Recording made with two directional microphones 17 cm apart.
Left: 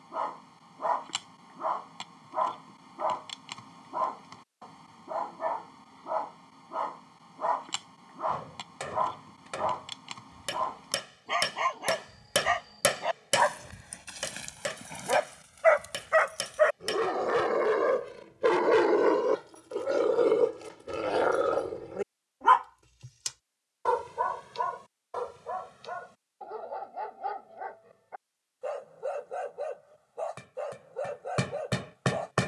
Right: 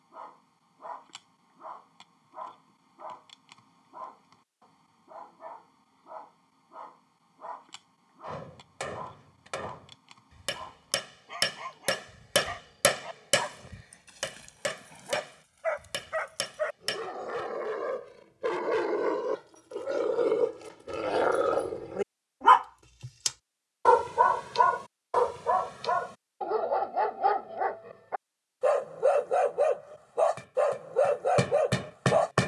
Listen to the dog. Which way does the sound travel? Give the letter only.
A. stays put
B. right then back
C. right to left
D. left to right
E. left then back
D.